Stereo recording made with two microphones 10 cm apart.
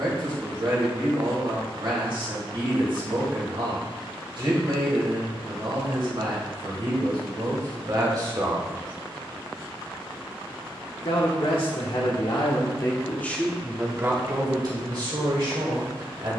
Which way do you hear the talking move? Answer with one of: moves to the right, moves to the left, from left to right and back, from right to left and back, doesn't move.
from right to left and back.